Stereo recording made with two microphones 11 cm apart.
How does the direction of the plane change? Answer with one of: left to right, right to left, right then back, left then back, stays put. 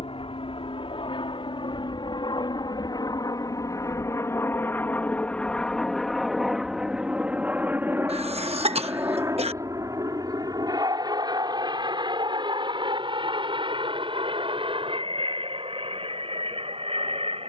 left to right.